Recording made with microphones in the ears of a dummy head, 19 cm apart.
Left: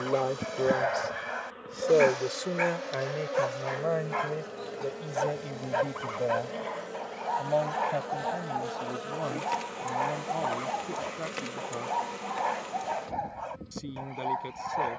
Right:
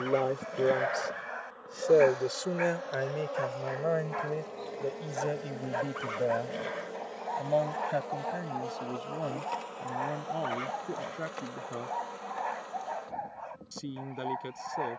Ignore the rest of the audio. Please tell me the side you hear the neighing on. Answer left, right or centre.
right.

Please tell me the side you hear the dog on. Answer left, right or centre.
left.